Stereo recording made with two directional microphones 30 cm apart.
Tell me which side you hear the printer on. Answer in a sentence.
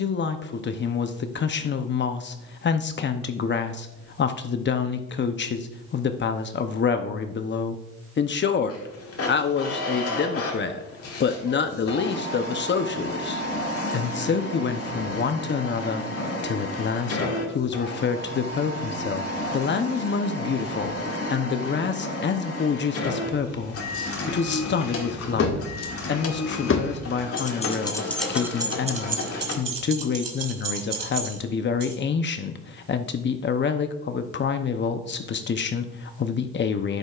In this clip you hear the printer on the left.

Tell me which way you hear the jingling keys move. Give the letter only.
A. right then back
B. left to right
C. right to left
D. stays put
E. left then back
B.